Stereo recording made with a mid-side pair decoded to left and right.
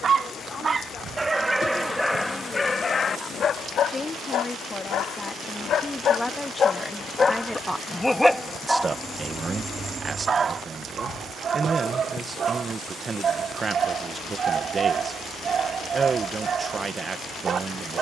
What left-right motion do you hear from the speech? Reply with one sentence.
In this clip you hear the speech go from the left side to the right.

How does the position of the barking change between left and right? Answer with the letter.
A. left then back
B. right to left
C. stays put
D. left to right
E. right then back
A.